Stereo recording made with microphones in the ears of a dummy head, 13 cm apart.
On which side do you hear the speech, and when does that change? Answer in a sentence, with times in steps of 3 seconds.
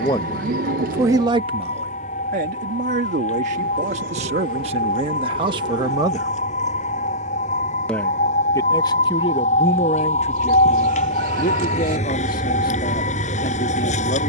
You can hear the speech on the right from 0 s, in the centre from 6 s and on the left from 9 s.